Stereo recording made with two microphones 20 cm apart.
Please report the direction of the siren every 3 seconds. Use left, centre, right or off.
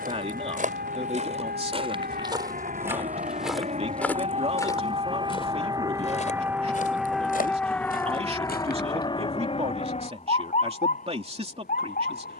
right, right, centre, left.